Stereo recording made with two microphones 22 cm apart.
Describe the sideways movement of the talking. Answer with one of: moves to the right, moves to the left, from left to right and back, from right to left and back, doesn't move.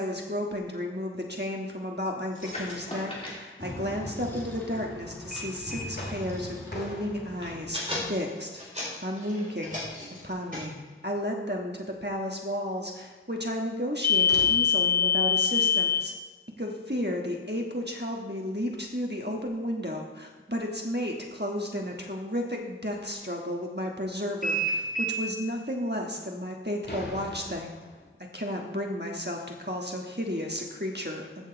doesn't move.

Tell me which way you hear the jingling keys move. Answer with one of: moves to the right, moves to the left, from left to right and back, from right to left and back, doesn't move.
moves to the right.